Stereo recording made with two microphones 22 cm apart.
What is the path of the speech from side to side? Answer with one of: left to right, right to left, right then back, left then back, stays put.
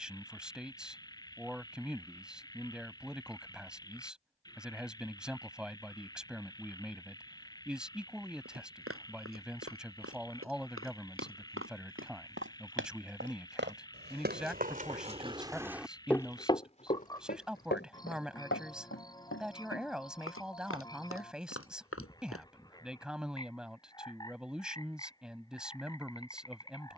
stays put.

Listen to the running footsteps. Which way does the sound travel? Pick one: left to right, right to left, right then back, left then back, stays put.
right to left.